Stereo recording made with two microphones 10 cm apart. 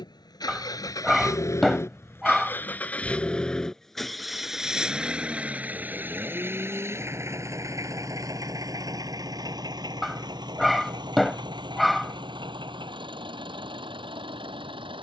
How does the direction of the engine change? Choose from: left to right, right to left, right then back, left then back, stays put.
left to right.